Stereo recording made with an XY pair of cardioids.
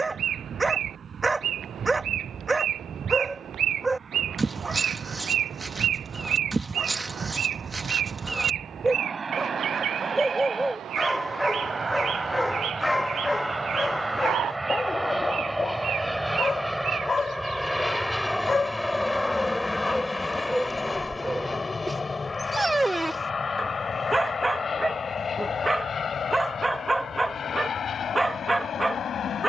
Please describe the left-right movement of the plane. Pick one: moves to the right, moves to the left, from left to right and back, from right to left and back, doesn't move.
moves to the left.